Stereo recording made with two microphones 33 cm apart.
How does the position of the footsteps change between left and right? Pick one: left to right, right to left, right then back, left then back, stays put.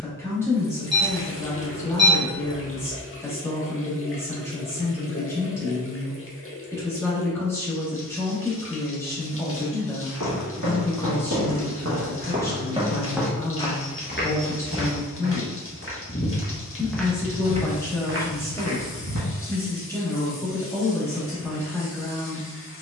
left then back.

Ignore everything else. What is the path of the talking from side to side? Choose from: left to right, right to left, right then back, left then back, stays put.
stays put.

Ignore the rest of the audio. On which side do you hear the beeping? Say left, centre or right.
right.